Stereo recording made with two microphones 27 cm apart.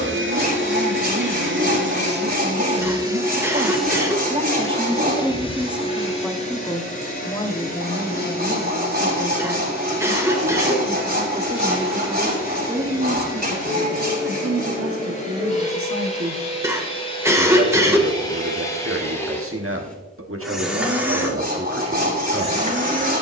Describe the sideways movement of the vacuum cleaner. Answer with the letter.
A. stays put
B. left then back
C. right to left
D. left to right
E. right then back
B.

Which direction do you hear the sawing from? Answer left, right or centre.
right.